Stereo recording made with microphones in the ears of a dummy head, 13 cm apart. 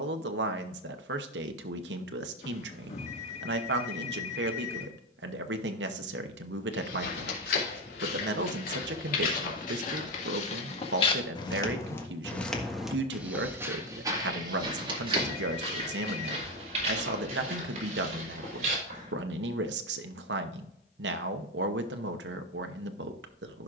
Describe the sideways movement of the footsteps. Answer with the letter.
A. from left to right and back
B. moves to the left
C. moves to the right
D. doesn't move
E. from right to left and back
C.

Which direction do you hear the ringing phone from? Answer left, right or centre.
left.